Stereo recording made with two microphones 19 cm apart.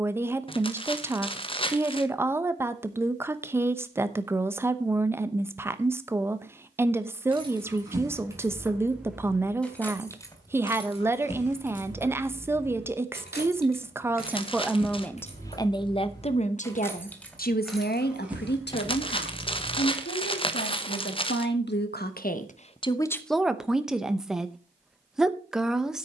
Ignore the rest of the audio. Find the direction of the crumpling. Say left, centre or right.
left.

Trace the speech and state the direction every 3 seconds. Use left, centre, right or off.
centre, centre, centre, centre, centre, left, left, left, centre.